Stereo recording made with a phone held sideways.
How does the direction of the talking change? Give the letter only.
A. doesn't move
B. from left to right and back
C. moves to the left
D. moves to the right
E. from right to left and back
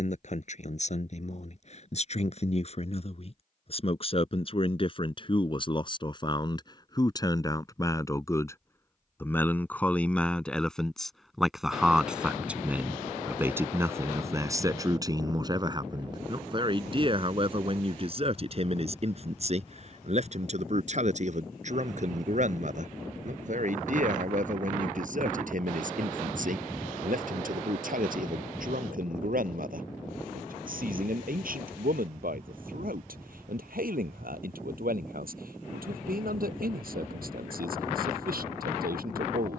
D.